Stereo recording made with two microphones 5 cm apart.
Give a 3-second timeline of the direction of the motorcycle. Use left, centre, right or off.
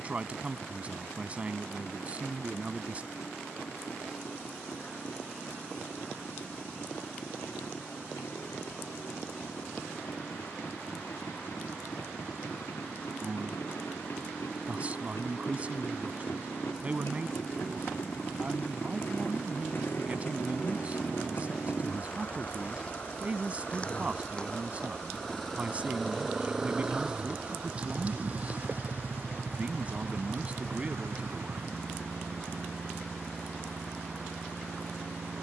left, left, left, left, left, left, left, left, centre, right, right, right.